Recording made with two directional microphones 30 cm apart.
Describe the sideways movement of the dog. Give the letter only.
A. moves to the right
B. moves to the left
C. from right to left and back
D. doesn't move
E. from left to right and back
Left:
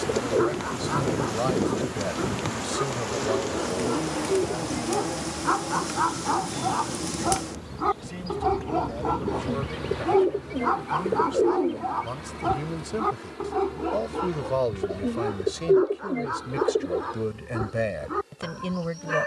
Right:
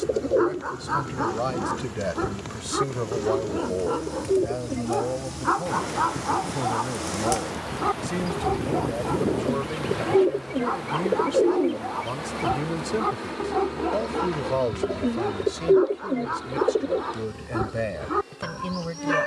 C.